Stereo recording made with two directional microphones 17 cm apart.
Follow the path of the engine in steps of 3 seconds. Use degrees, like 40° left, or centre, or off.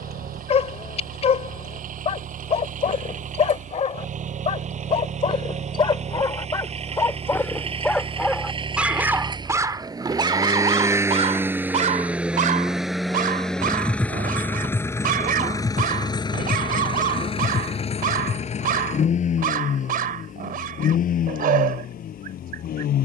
50° right, 40° right, 30° right, 20° right, centre, 30° left, 50° left, 60° left.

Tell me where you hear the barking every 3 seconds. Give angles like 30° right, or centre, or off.
40° left, 40° left, 10° left, 30° right, 50° right, 60° right, 60° right, 60° right.